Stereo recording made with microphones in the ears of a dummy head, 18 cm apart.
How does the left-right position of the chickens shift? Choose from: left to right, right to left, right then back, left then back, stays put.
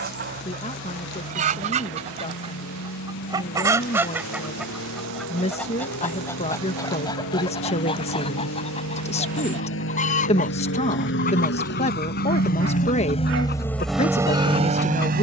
right to left.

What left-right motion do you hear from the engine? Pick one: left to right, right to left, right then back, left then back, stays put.
left to right.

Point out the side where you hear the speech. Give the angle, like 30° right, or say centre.
30° left.